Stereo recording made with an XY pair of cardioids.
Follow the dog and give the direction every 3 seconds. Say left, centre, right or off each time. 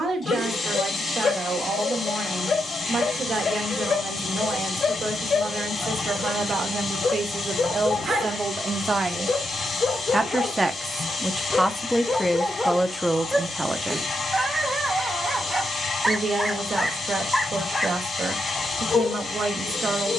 left, left, left, left, centre, centre, left.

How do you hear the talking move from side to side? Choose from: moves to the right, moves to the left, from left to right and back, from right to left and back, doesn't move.
from right to left and back.